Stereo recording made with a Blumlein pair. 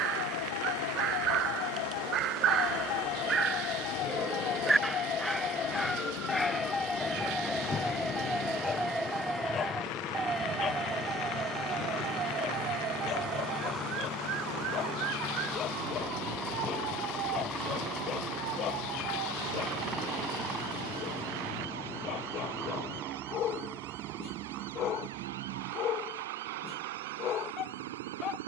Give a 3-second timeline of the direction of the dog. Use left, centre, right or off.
right, centre, centre, left, left, left, left, left, left, left.